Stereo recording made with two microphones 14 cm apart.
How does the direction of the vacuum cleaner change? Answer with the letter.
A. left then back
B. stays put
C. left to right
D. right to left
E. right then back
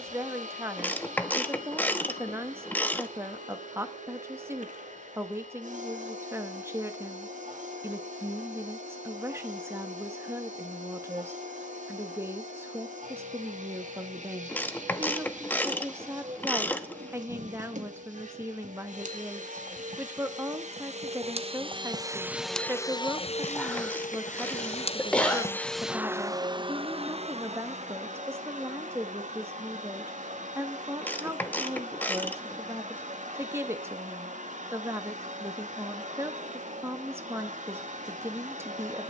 A.